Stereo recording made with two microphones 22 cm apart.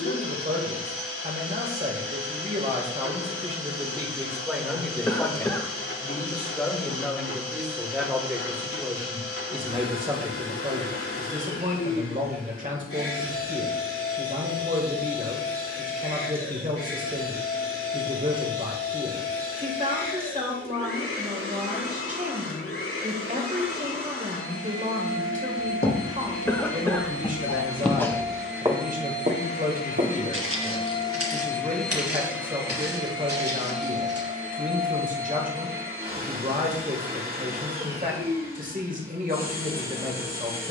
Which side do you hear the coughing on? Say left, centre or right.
centre.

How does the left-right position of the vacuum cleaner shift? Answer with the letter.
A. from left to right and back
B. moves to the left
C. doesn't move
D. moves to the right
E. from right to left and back
D.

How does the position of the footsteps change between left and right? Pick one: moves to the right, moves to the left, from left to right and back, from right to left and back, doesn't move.
moves to the right.